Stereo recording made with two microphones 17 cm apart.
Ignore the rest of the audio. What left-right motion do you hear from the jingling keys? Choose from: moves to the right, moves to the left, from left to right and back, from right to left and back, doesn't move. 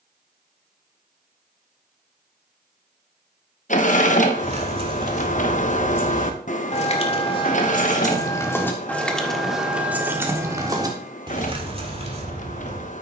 from right to left and back.